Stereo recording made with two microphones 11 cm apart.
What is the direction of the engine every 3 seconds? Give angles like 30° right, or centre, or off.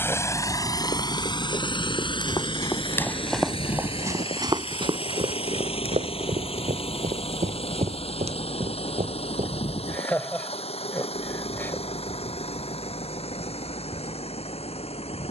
40° left, 60° left, 60° left, 70° left, 70° left.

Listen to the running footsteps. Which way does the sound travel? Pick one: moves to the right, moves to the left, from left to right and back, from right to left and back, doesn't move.
moves to the right.